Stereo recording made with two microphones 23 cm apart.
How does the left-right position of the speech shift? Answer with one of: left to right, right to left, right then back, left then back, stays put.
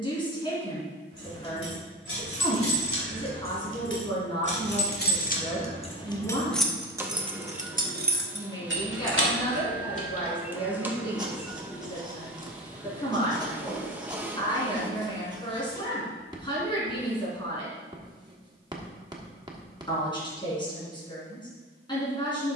stays put.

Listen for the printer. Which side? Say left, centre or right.
centre.